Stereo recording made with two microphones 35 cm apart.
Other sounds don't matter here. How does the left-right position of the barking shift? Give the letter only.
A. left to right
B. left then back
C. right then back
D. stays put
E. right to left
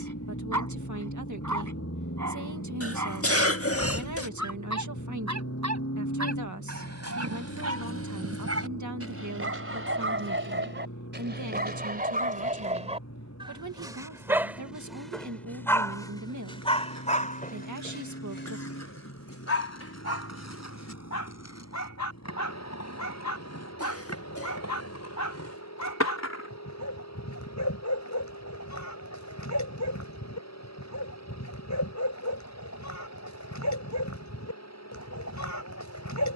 E.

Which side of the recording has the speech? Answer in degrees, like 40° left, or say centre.
60° right.